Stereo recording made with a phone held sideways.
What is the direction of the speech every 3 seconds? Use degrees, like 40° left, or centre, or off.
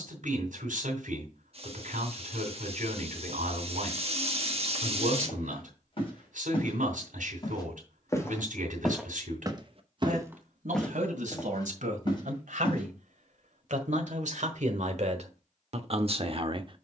70° right, 70° right, 70° right, 70° right, 60° right, 50° right.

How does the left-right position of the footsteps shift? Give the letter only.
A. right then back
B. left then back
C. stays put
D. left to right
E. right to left
A.